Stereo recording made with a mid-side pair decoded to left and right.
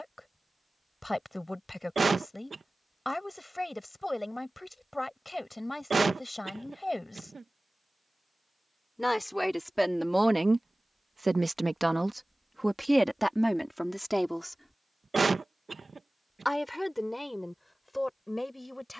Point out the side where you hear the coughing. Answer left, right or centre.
right.